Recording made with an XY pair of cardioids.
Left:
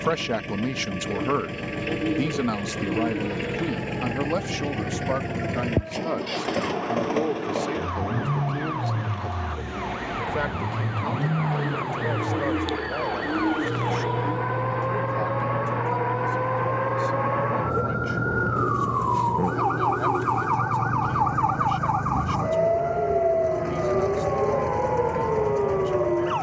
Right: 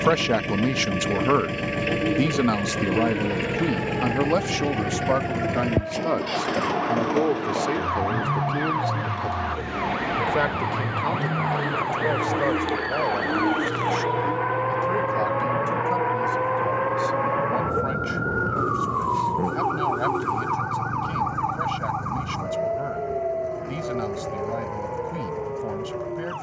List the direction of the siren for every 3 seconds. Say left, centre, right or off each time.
right, right, right, right, right, centre, centre, left, left.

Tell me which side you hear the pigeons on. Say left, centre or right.
centre.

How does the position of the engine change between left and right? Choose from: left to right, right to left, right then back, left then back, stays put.
right to left.